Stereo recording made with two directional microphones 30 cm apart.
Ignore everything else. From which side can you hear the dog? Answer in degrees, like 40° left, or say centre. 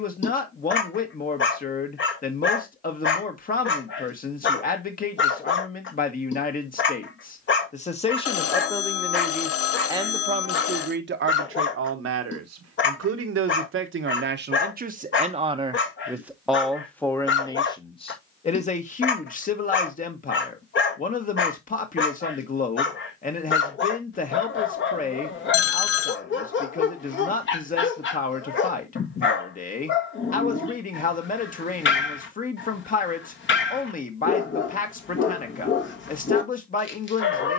40° left.